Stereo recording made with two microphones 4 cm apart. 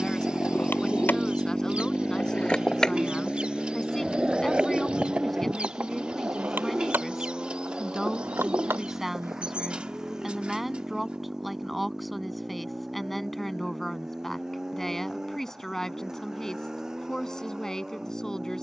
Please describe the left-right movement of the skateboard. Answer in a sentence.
You can hear the skateboard move from left to right.